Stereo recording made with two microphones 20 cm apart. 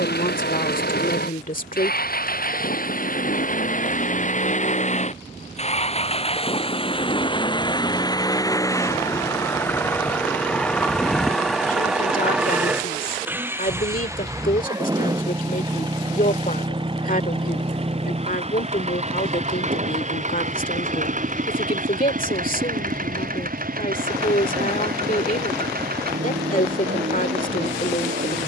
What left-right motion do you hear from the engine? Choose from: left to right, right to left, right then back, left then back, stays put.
left to right.